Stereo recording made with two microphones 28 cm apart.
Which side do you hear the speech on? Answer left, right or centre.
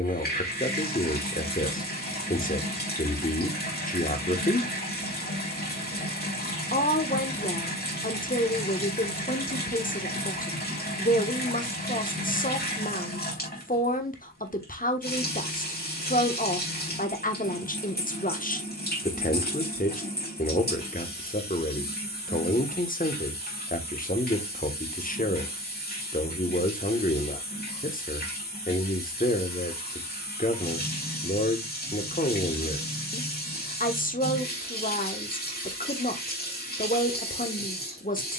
left.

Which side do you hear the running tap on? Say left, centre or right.
left.